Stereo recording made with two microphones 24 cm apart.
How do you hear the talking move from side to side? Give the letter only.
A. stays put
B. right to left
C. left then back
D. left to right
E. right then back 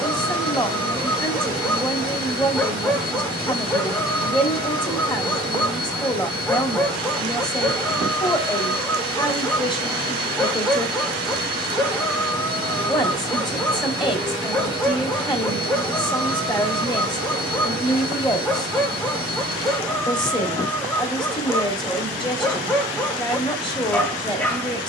A.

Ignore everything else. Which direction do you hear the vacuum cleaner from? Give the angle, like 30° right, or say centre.
60° left.